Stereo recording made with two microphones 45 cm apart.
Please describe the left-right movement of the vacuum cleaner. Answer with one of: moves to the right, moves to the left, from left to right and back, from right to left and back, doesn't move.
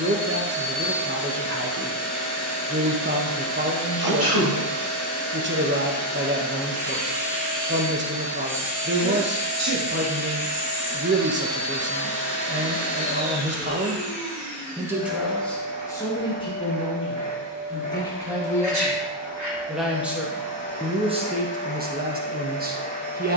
doesn't move.